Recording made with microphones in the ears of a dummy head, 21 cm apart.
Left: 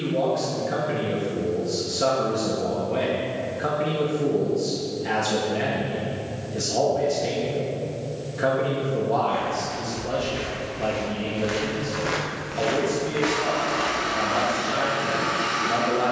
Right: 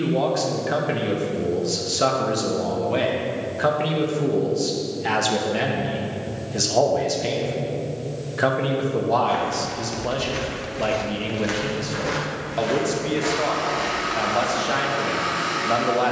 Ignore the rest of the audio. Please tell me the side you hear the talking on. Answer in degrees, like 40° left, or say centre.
30° right.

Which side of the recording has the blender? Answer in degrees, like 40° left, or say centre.
10° left.